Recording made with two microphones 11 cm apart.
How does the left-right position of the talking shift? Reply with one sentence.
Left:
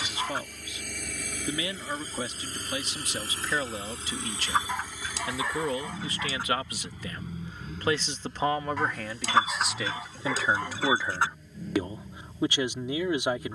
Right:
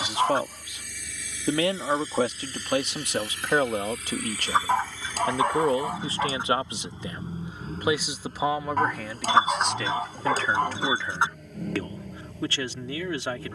You can hear the talking move from right to left.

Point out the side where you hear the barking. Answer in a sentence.
In this clip you hear the barking on the right.